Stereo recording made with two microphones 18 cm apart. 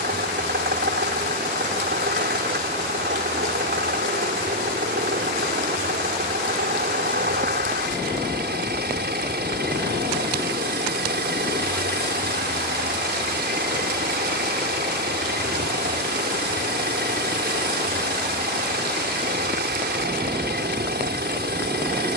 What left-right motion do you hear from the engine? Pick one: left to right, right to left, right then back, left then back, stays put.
stays put.